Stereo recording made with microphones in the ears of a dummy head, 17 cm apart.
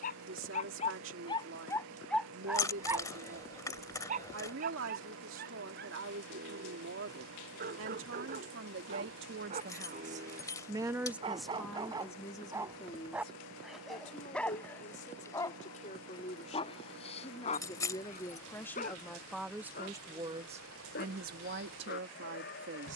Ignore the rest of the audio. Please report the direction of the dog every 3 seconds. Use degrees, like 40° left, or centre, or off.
20° left, 50° right, 50° right, 30° right, centre, 30° left, 50° left, 60° left.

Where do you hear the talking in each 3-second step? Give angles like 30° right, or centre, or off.
80° right, 80° right, 70° right, 30° right, 30° left, 30° left, centre, 60° right.